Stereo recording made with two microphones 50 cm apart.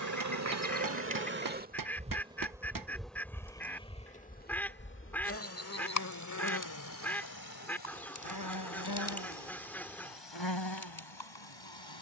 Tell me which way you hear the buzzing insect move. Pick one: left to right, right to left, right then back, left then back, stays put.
right to left.